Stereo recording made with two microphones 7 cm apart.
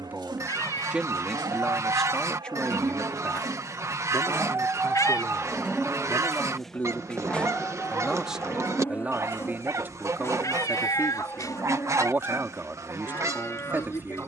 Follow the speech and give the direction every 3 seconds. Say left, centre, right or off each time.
centre, left, centre, right, right.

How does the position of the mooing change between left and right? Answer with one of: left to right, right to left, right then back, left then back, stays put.
right to left.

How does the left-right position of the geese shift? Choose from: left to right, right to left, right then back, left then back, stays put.
stays put.